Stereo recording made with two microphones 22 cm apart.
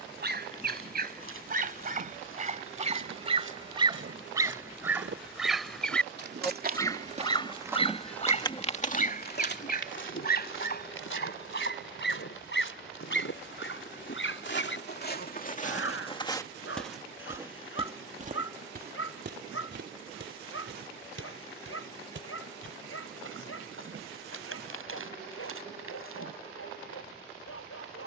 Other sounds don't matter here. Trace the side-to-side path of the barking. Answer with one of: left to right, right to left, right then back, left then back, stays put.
right to left.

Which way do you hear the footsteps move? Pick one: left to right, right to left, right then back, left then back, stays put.
left then back.